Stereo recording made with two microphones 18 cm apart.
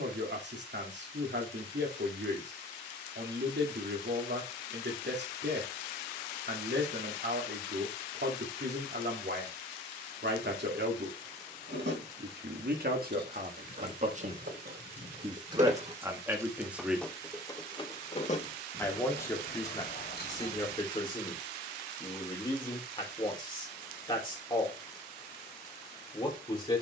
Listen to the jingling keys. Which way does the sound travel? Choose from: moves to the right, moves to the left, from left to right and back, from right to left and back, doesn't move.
moves to the left.